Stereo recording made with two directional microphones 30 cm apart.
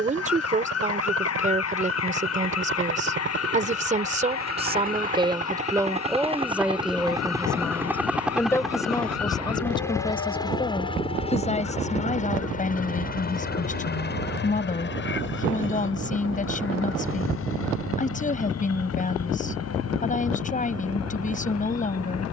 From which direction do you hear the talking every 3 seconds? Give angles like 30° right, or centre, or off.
30° right, 20° right, centre, 20° left, 30° left, 30° left, 30° left, 30° left.